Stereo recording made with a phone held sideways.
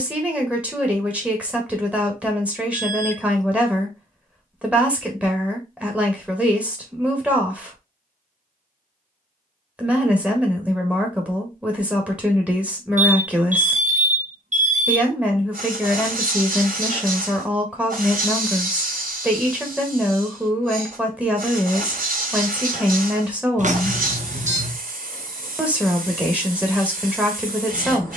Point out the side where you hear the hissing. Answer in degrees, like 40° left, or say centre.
70° right.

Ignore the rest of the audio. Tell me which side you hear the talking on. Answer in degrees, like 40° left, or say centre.
10° right.